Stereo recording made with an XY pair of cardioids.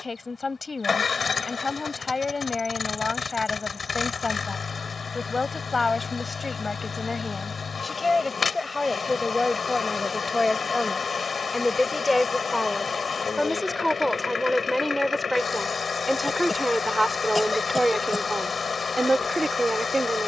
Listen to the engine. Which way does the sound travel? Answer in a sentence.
In this clip you hear the engine stay put.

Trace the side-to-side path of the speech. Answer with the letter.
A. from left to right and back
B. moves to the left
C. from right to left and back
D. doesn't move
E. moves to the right
E.